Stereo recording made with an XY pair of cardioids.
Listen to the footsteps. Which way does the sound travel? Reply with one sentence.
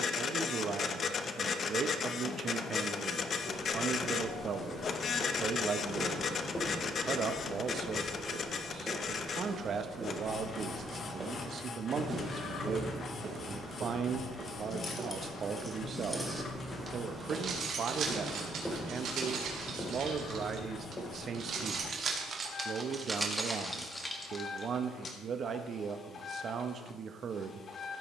In this clip you hear the footsteps move from left to right and back again.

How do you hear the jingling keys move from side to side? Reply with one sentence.
You can hear the jingling keys move from left to right and back again.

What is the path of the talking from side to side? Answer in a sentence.
In this clip you hear the talking stay put.